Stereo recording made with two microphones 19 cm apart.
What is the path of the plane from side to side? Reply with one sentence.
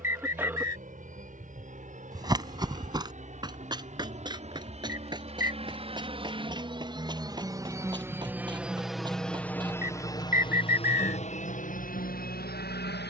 You can hear the plane move from right to left.